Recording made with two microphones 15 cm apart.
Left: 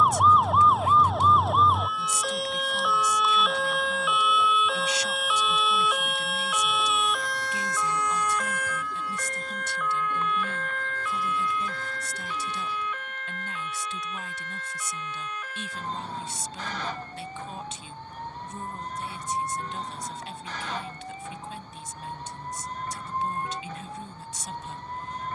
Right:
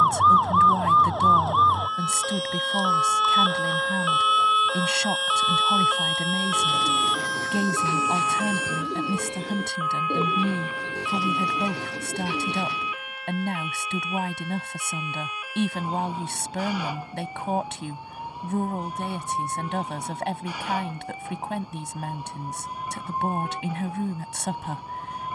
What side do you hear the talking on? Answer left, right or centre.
right.